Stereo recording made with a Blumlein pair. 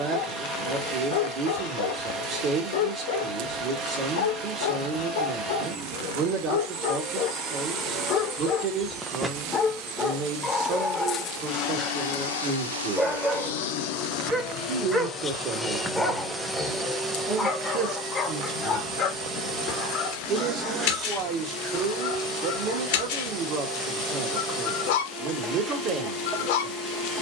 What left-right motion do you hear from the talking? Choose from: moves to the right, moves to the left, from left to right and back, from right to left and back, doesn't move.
doesn't move.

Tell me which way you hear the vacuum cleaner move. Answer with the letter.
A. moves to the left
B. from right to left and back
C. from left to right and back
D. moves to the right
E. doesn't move
B.